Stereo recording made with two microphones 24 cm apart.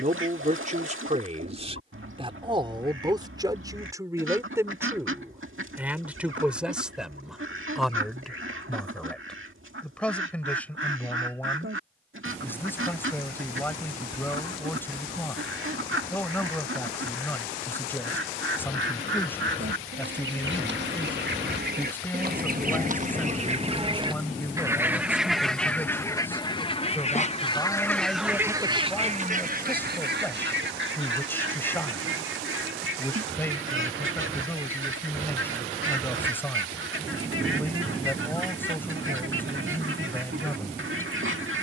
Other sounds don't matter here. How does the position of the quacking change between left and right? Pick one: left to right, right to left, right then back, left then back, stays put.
left then back.